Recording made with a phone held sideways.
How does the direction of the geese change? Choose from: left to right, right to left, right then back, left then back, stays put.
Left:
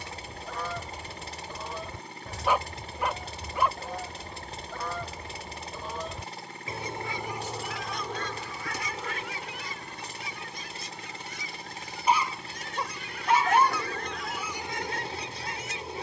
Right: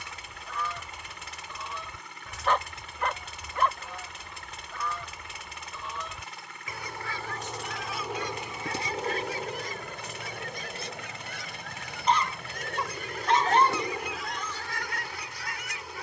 right then back.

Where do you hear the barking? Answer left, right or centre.
centre.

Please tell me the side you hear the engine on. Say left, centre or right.
left.